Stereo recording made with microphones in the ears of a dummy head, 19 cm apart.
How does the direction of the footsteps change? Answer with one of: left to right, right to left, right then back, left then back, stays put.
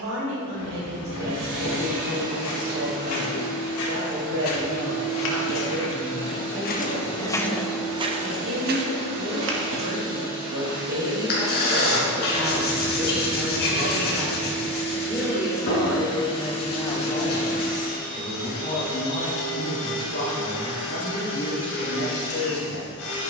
left to right.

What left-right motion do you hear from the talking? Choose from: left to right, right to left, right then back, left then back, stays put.
right to left.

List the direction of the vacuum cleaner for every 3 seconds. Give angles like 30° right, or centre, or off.
40° right, 40° right, 30° right, 20° right, centre, 30° left, 60° left, 70° left.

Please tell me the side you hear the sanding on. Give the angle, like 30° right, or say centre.
50° left.